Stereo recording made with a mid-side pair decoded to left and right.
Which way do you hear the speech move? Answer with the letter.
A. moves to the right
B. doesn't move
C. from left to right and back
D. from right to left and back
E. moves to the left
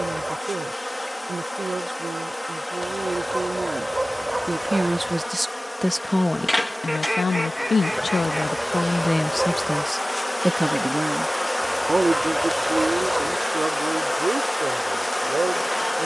D.